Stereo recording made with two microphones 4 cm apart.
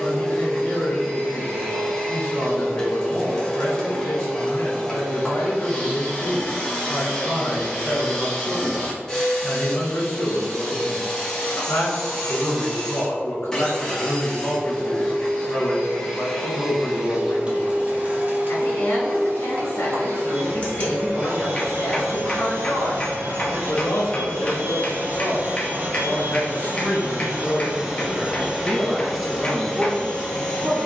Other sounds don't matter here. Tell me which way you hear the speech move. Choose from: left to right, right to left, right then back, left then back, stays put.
left to right.